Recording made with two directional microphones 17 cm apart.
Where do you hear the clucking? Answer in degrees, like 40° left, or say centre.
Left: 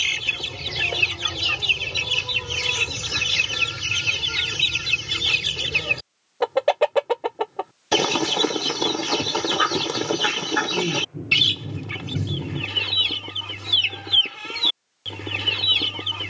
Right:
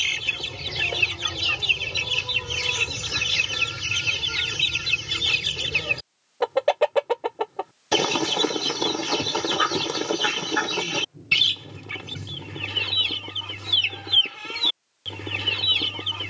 10° left.